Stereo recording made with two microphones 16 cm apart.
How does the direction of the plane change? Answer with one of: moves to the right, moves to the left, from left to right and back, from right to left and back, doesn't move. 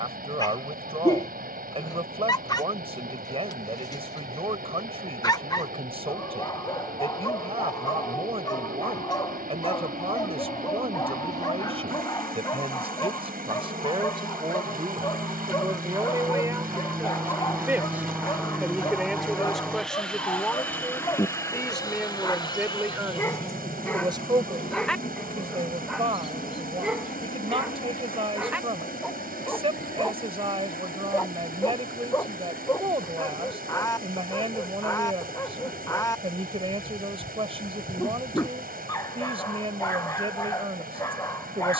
moves to the left.